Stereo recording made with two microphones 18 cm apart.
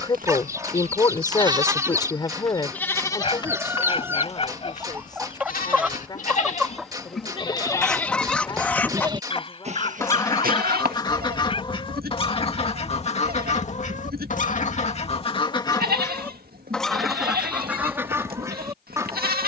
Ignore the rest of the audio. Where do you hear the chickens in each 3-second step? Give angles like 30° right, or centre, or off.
20° right, 10° right, centre, 20° left, 40° left, 10° left, 20° right.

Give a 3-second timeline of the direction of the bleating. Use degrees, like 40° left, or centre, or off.
20° right, 40° left, 20° left, 50° right, 60° right, 60° right, 60° right.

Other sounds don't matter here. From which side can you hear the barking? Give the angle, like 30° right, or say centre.
30° left.